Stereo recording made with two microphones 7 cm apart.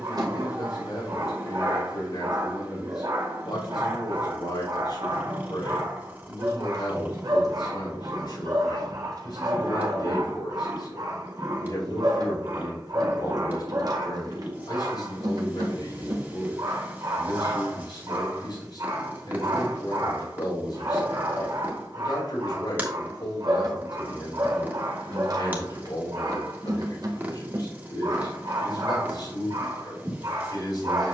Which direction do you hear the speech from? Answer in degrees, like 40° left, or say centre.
90° left.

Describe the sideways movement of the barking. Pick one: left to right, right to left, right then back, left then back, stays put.
stays put.